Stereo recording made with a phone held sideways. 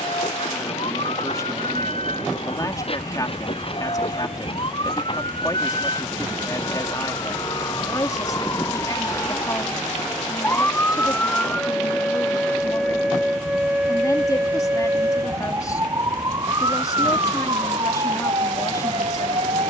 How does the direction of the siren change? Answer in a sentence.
In this clip you hear the siren move to the right.